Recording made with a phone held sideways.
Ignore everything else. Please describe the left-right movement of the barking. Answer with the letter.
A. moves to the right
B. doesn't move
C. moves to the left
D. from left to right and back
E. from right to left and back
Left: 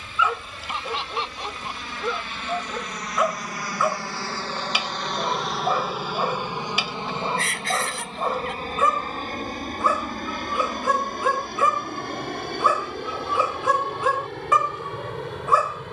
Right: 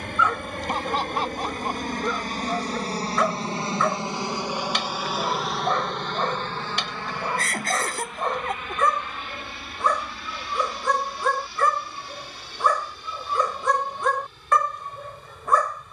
B.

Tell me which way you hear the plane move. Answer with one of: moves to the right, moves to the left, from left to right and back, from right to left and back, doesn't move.
moves to the left.